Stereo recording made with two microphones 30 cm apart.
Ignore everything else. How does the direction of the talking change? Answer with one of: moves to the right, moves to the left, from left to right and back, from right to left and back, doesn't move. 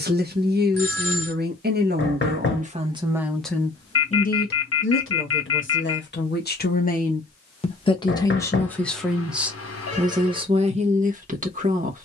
from right to left and back.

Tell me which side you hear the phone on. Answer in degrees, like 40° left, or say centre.
50° left.